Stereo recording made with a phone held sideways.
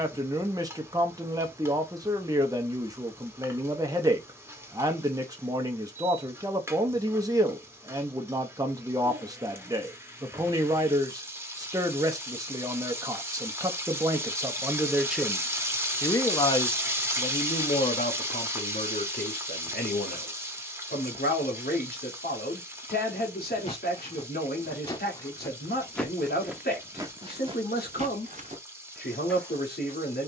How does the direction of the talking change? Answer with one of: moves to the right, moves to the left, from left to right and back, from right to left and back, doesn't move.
moves to the left.